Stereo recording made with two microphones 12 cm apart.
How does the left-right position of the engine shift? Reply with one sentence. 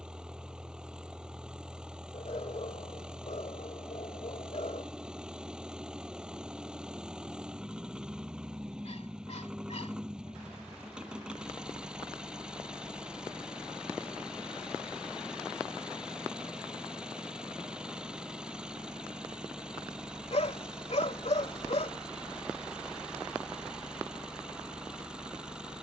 In this clip you hear the engine stay in one place.